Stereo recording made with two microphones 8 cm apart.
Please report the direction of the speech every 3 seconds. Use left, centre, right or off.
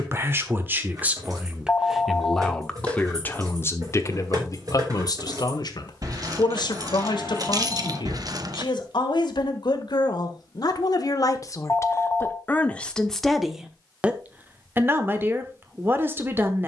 centre, left, left, left, centre, right.